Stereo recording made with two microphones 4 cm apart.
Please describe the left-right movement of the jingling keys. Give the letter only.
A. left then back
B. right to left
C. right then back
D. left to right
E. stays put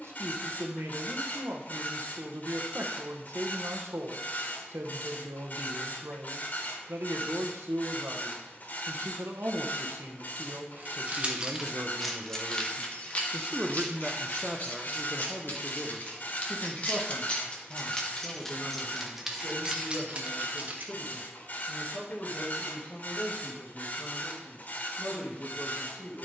A.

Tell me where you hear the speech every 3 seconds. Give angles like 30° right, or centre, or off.
70° right, 70° right, 70° right, 70° right, 30° right, 20° left, 30° left, 40° left, 40° left.